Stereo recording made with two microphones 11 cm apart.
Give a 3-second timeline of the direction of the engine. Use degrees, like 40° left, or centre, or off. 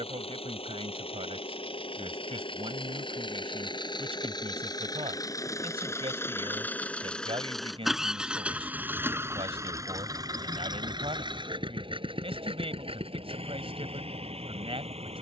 60° left, 40° left, centre, 40° right, 60° right.